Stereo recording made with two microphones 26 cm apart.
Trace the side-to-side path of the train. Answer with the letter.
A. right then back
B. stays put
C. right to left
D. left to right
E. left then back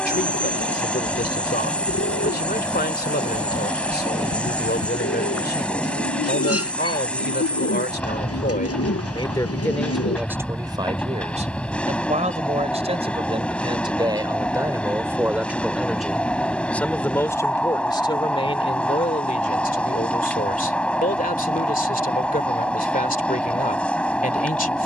B.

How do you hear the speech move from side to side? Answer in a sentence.
You can hear the speech go right and come back.